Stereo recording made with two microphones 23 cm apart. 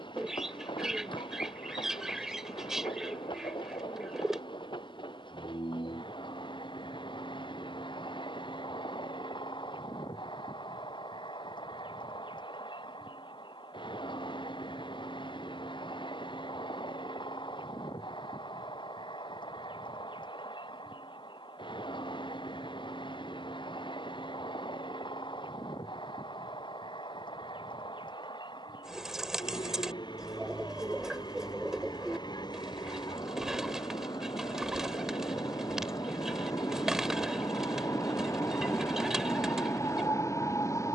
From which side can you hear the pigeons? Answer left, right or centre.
centre.